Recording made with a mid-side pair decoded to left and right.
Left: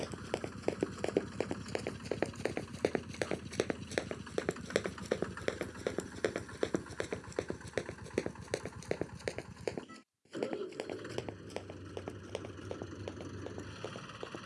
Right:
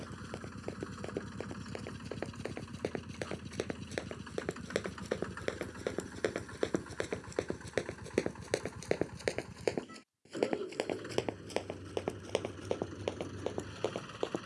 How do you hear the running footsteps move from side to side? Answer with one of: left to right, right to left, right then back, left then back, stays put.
left to right.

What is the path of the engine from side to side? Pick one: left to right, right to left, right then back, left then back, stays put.
stays put.